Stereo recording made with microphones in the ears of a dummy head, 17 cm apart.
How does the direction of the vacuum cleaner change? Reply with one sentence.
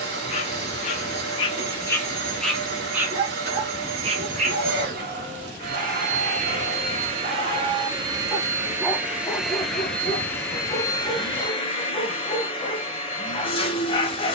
You can hear the vacuum cleaner move from right to left.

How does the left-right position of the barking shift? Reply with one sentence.
You can hear the barking go right and come back.